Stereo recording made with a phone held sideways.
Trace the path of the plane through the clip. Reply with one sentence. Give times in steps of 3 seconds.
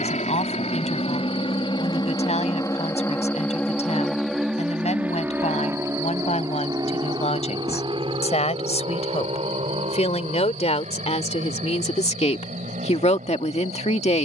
In this clip you hear the plane on the left from 0 s, in the centre from 3 s and on the right from 6 s.